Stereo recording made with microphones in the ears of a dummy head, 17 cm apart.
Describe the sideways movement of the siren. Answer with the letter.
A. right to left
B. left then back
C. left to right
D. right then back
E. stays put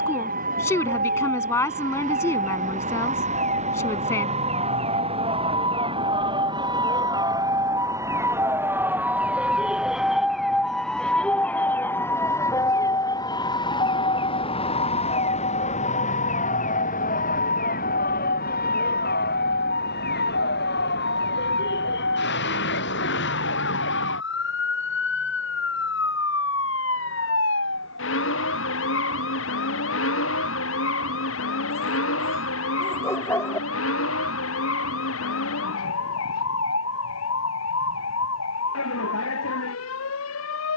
A.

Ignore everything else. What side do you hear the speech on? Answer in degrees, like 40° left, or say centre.
10° left.